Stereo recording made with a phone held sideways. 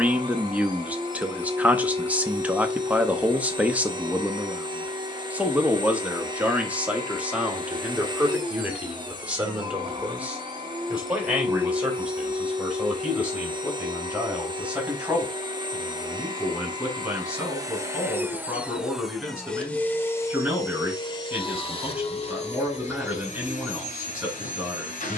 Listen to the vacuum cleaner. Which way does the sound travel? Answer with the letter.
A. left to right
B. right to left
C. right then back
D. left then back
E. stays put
B.